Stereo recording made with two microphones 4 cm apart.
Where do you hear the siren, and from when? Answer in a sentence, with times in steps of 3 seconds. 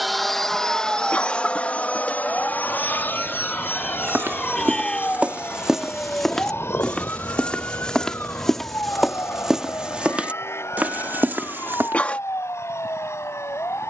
You can hear the siren on the right from 0 s, in the centre from 3 s and on the left from 6 s.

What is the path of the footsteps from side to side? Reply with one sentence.
You can hear the footsteps move from right to left and back again.